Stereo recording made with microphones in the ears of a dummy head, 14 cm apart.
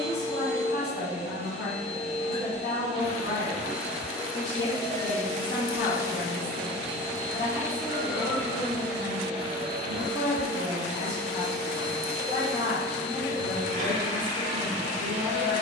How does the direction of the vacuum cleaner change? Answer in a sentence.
In this clip you hear the vacuum cleaner move to the right.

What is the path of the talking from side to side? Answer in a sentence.
You can hear the talking stay put.